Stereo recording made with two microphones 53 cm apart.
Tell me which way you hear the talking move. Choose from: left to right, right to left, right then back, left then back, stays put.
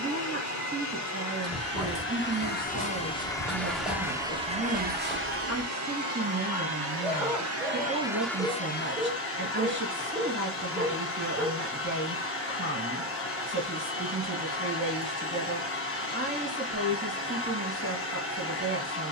stays put.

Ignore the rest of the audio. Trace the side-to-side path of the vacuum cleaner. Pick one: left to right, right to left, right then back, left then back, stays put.
right then back.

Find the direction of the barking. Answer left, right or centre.
centre.